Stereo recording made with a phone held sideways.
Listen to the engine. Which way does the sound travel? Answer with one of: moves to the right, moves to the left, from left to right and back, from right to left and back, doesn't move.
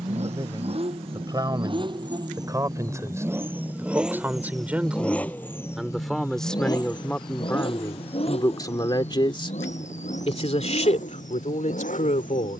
moves to the left.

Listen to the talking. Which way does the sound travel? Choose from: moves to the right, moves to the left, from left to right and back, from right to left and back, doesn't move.
moves to the left.